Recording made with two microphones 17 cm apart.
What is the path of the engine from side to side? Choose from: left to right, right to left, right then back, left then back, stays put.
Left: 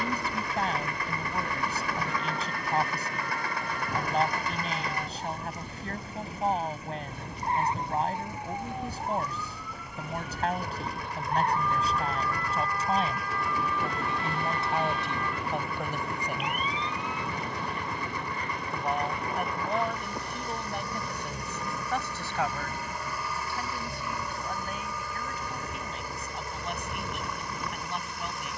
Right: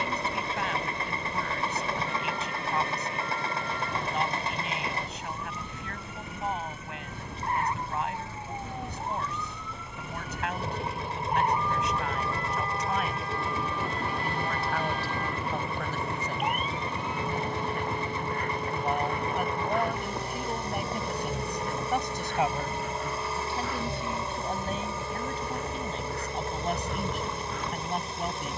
stays put.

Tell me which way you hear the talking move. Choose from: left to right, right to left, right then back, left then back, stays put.
left to right.